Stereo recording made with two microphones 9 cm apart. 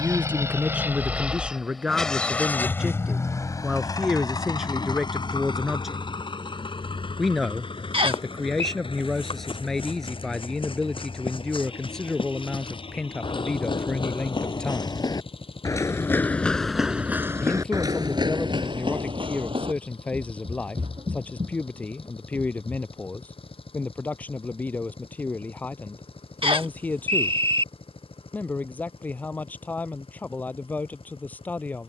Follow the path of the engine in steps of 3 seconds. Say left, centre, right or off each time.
centre, left, left, left, left, left, left, left, left, left, left.